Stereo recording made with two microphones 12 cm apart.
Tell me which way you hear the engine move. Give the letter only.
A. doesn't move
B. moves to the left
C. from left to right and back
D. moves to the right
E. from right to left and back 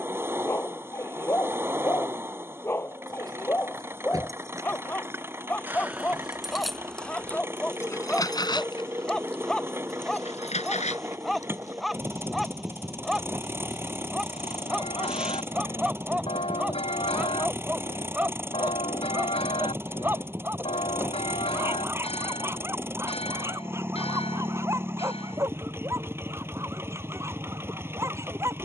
A.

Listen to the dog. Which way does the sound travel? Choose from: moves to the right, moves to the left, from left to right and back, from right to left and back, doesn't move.
moves to the right.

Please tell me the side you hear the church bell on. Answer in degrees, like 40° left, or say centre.
50° left.